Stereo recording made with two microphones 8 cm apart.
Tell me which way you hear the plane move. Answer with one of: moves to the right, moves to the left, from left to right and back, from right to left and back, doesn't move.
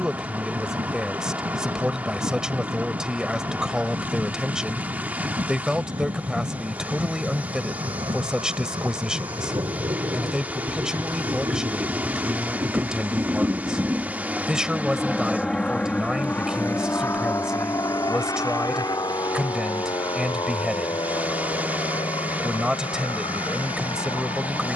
moves to the left.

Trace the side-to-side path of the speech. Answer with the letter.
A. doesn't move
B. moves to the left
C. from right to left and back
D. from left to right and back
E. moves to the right
A.